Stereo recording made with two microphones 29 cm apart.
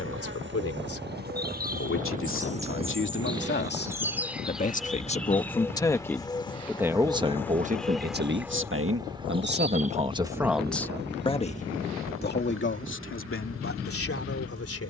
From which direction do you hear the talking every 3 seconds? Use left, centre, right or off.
left, left, right, centre, left.